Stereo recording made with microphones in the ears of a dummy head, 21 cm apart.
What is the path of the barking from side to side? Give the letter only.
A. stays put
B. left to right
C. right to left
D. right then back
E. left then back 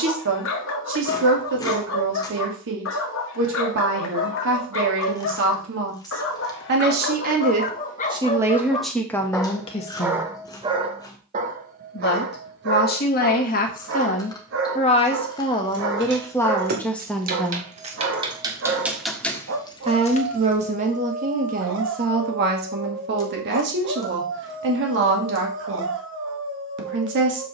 B.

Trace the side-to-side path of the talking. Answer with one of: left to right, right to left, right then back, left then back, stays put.
left then back.